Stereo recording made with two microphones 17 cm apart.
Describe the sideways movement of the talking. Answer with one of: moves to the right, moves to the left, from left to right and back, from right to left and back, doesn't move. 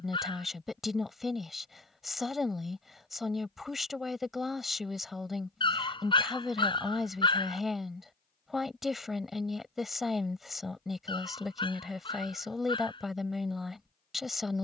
doesn't move.